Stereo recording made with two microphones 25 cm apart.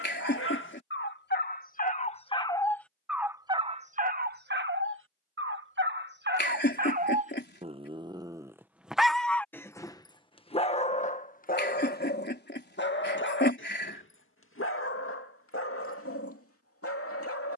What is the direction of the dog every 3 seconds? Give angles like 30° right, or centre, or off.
40° left, 40° right, 30° right, 20° left, 50° left, 60° left.